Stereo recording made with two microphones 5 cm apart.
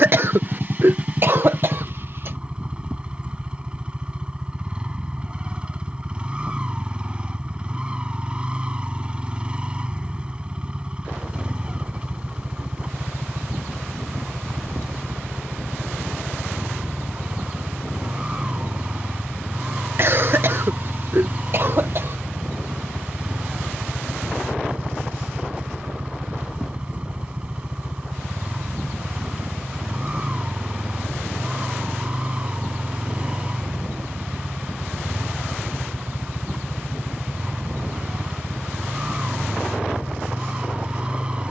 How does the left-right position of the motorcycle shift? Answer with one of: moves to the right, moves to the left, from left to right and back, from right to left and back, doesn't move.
doesn't move.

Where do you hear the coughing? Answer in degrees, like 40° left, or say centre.
50° right.